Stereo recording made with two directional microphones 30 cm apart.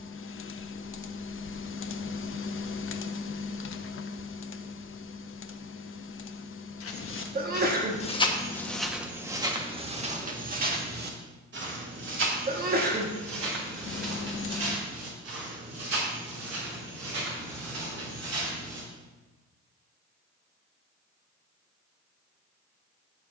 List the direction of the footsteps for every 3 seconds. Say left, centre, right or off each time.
off, off, left, right, right, right, right, off.